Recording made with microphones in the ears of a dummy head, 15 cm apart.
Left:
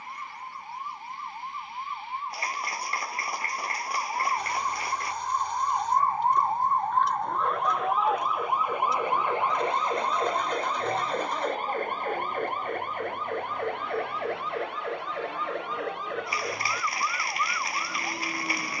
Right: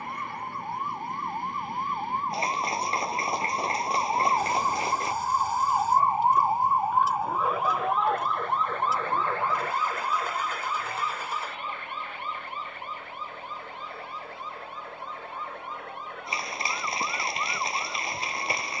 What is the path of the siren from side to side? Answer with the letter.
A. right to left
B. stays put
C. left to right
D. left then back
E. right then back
A.